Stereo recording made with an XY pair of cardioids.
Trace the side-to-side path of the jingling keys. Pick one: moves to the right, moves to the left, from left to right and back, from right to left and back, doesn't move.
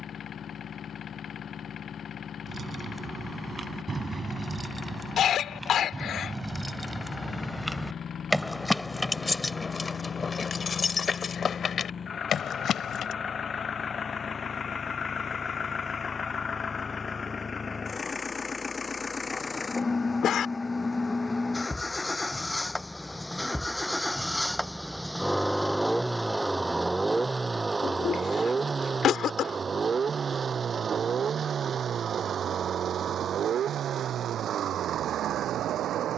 moves to the left.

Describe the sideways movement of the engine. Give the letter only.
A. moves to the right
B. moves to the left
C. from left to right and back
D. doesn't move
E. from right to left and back
A.